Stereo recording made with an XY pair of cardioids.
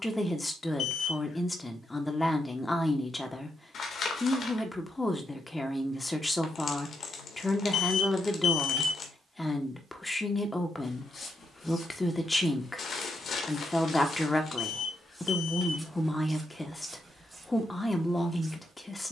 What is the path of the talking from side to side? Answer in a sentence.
In this clip you hear the talking stay in one place.